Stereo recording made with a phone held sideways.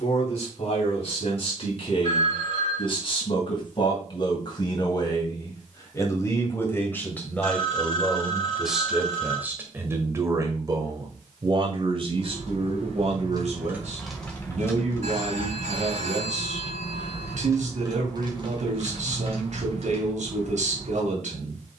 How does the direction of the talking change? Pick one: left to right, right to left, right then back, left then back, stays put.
left to right.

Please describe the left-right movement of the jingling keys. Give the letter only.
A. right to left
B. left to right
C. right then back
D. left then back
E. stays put
D.